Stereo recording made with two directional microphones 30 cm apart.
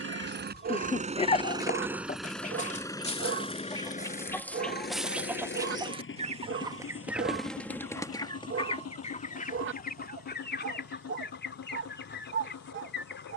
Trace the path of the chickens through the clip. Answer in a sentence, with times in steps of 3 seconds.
You can hear the chickens on the left from 0 s, in the centre from 3 s and on the left from 9 s.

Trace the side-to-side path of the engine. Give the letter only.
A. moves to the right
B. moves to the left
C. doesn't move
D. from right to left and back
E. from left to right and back
B.